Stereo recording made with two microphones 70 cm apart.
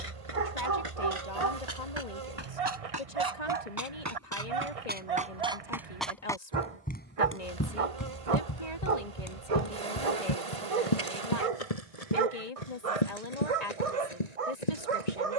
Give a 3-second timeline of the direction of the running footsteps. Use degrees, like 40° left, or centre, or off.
40° right, 20° right, 20° left, 50° left, 60° left.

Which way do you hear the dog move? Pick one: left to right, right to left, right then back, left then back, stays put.
stays put.